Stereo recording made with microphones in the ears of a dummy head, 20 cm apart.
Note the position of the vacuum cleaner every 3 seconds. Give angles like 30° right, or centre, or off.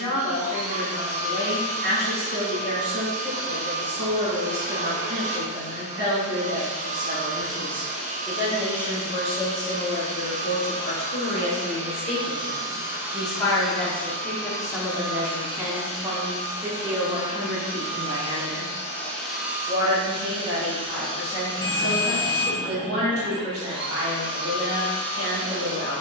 30° right, 30° right, 30° right, 30° right, centre, 30° left, centre, 20° right, 20° right.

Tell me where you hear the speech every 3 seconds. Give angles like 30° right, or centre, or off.
50° right, 50° right, 30° right, 40° left, 10° left, 20° right, 40° right, 50° right, 50° right.